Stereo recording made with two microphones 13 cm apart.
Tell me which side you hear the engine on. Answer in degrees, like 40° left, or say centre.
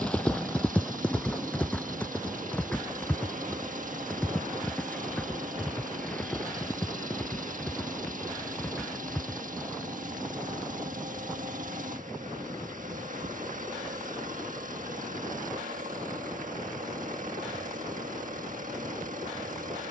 70° right.